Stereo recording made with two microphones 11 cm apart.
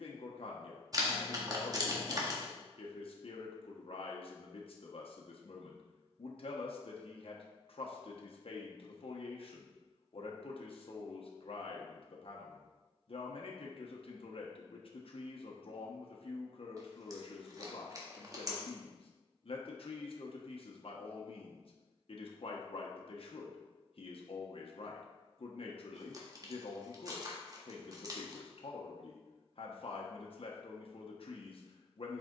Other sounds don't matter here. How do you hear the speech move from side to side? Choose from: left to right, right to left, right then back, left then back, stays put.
stays put.